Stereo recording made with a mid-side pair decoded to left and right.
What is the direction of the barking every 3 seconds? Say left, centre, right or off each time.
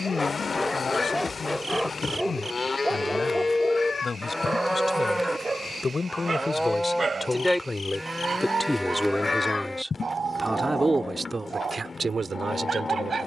centre, right, right, right, right.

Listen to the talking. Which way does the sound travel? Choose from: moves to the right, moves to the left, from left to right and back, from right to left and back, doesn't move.
moves to the right.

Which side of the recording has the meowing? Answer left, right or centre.
left.